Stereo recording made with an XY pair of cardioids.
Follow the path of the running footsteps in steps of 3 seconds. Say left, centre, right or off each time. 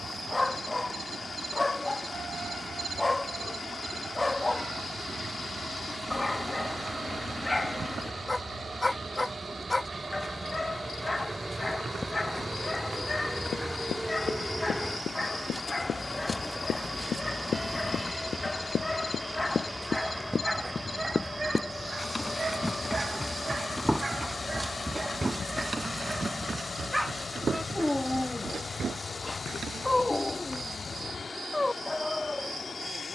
off, off, off, off, left, left, left, centre, right, right, off.